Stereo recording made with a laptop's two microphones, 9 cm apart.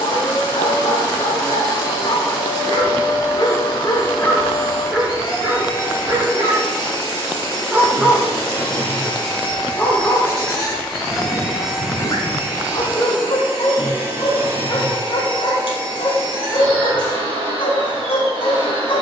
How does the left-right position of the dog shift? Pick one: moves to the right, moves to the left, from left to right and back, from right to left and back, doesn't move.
from left to right and back.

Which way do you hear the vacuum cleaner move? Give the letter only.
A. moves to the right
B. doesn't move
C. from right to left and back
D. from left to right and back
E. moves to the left
A.